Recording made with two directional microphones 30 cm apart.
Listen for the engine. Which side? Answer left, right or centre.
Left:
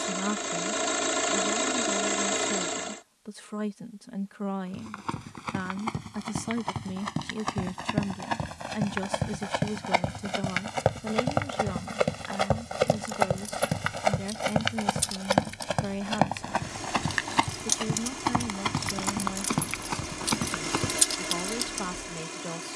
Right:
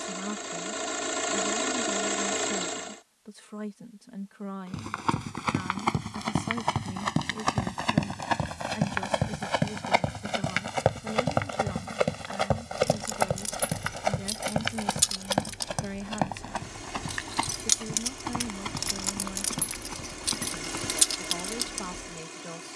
left.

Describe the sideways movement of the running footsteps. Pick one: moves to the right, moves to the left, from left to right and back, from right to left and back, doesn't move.
moves to the left.